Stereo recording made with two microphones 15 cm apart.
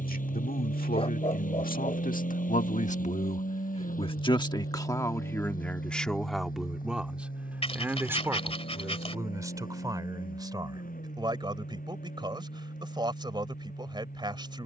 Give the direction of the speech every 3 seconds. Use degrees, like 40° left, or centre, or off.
70° left, 30° left, 10° right, 30° right, 30° right.